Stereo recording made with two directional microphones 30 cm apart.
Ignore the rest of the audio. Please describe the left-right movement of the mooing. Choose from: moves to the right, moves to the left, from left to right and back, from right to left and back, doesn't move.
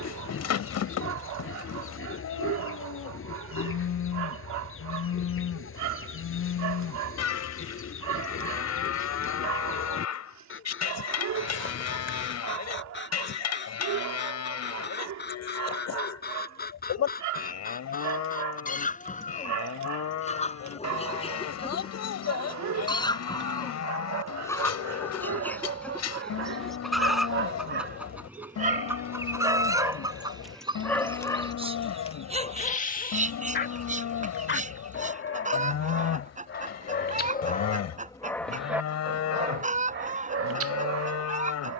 doesn't move.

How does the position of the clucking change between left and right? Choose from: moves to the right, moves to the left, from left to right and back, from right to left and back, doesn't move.
moves to the right.